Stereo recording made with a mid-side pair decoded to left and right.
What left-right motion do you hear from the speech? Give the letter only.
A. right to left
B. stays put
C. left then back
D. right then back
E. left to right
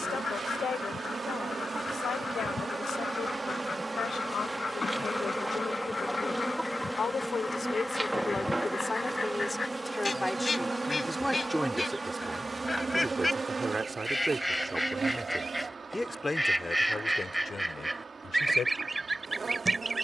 D.